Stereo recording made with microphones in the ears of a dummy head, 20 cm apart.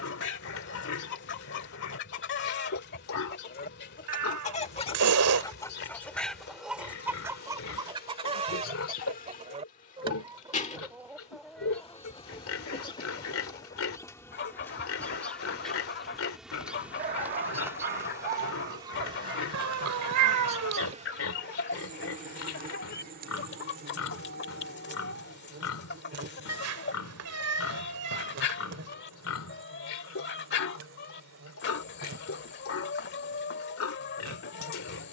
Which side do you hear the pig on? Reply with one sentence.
You can hear the pig on the left.